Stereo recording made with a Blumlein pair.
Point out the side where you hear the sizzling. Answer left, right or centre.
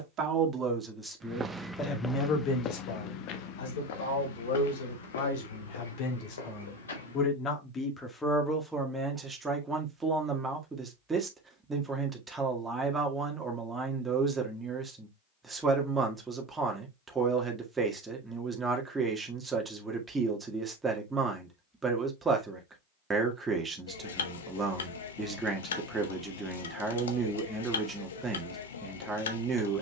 left.